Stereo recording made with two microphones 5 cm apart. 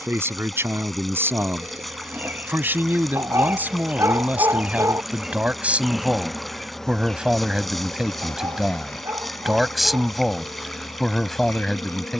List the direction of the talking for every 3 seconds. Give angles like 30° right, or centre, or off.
50° right, 30° right, 10° right, centre.